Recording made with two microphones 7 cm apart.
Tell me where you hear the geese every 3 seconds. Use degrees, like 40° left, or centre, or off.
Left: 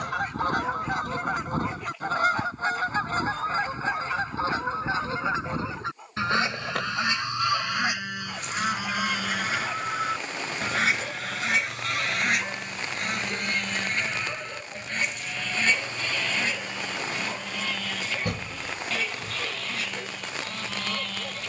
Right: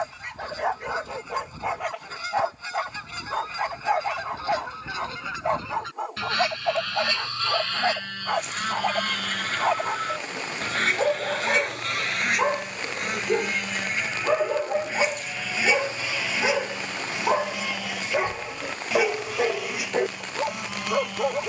60° left, 40° left, 20° left, 10° left, centre, 10° right, 10° right.